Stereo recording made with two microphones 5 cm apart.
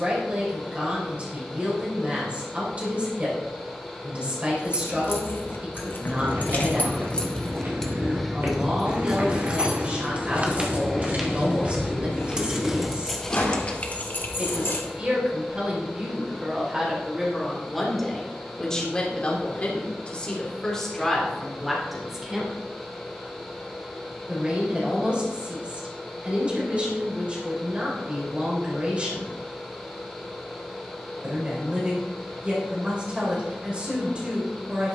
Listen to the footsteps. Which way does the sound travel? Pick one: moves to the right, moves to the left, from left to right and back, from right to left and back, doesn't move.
moves to the left.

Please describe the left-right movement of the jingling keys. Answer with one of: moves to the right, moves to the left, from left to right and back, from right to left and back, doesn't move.
from left to right and back.